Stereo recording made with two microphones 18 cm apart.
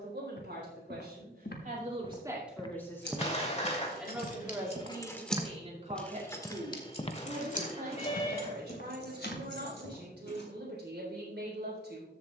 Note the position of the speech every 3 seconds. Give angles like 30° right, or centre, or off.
40° right, 20° right, 60° right, 70° right.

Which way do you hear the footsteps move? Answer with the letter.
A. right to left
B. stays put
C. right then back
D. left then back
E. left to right
C.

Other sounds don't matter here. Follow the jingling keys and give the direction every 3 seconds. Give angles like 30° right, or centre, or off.
off, 40° left, 40° left, 70° left.